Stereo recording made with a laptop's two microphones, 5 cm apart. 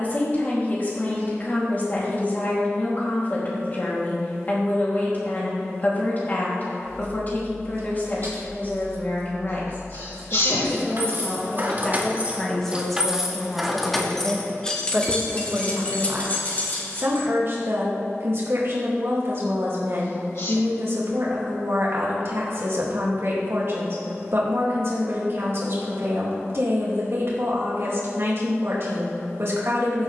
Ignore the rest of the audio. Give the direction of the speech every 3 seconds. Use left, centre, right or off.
left, left, left, left, centre, right, right, right, right, right.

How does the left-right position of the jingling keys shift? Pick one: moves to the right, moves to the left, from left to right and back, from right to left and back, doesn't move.
moves to the left.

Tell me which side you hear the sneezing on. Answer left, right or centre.
left.